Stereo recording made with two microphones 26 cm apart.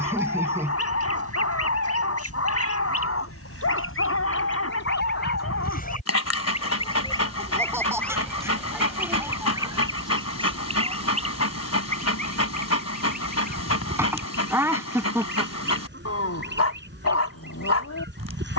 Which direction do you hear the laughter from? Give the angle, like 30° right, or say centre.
10° right.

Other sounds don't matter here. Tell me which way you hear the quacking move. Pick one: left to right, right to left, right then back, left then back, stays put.
left to right.